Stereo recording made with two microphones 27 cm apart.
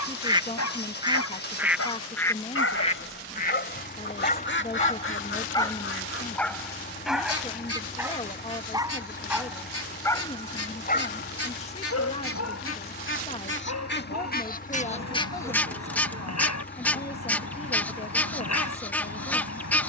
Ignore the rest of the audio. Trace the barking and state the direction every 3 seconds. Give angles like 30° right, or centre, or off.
70° left, 30° left, centre, 20° left, 80° left, 80° left, 80° left.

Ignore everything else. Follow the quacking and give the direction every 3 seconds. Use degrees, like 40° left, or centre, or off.
centre, 40° left, 60° left, 60° left, 40° left, 10° left, 10° left.